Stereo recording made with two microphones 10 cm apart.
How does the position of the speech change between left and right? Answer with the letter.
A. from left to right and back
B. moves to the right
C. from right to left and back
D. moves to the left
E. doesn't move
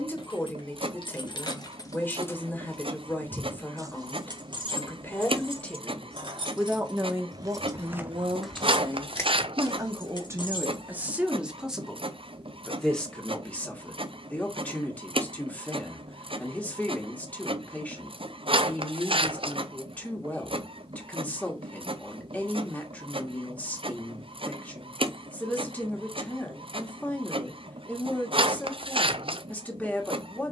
A.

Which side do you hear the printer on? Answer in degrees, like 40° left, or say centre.
70° right.